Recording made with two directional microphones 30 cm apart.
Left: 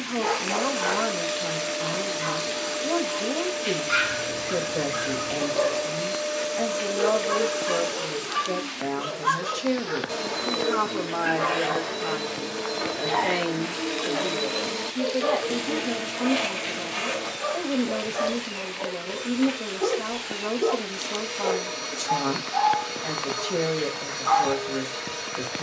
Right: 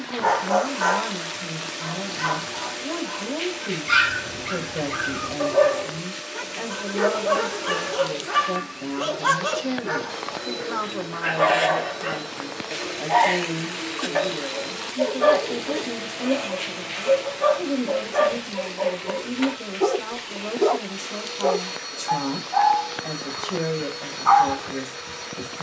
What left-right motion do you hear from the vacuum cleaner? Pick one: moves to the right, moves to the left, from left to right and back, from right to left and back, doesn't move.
doesn't move.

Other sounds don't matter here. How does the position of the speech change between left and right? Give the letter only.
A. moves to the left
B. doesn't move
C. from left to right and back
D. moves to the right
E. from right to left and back
B.